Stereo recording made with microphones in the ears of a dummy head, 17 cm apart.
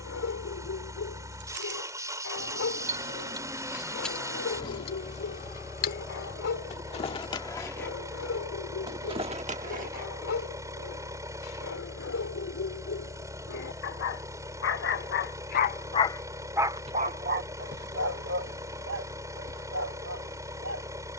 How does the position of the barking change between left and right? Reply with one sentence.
You can hear the barking move to the right.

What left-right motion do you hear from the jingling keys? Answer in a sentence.
You can hear the jingling keys move from right to left and back again.